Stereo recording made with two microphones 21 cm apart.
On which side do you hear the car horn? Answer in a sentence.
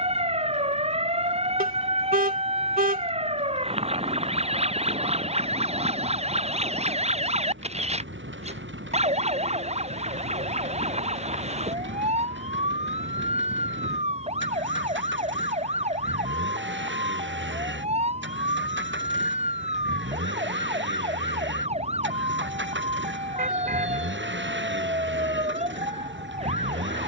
In this clip you hear the car horn on the right.